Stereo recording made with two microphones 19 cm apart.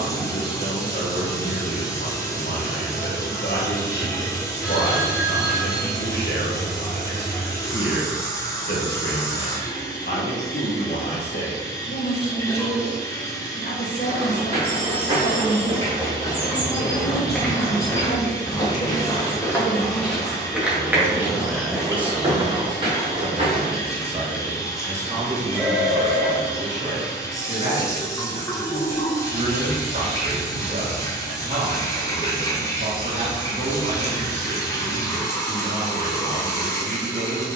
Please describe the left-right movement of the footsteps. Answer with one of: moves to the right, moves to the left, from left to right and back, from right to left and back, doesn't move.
from right to left and back.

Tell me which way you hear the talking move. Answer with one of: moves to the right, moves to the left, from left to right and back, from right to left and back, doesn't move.
moves to the right.